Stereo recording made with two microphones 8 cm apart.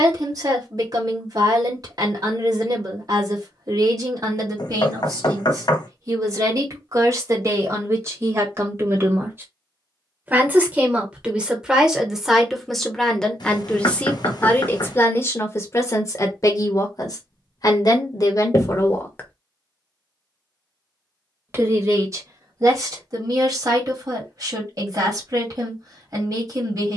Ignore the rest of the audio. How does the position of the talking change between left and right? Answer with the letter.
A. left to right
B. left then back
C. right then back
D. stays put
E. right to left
B.